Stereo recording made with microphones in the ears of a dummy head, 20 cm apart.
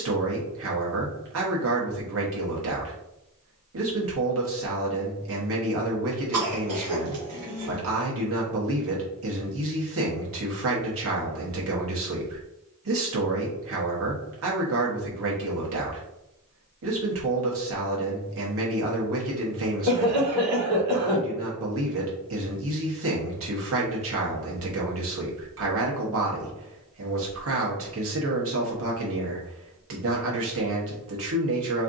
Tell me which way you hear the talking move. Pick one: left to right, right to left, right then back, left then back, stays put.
stays put.